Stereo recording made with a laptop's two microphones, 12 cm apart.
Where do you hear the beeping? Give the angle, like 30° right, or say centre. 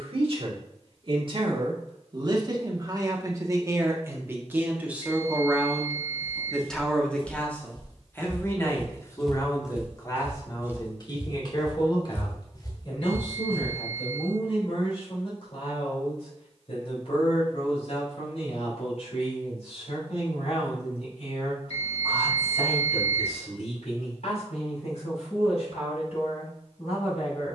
60° left.